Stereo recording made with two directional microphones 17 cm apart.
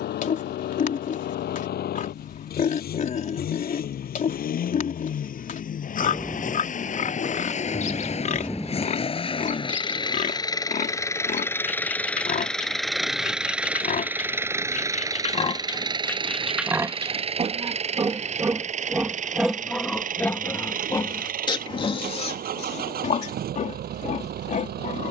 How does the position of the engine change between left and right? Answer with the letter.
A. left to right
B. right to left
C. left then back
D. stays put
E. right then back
A.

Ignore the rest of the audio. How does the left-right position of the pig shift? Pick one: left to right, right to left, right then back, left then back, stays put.
right then back.